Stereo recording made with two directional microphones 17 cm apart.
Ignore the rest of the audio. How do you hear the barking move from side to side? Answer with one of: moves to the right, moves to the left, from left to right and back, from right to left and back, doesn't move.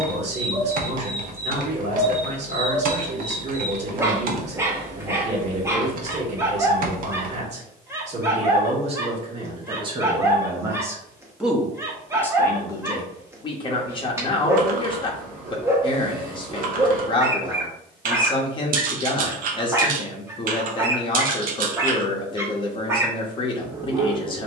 doesn't move.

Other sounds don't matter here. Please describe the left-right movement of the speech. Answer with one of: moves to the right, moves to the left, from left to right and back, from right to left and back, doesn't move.
moves to the left.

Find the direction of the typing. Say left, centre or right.
right.